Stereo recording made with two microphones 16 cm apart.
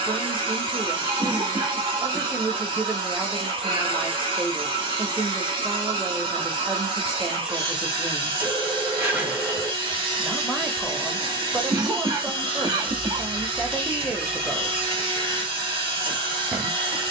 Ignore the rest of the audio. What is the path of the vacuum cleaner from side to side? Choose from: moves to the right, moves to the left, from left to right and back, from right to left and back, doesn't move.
doesn't move.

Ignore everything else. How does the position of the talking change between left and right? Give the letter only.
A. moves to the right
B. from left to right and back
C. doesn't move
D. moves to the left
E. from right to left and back
C.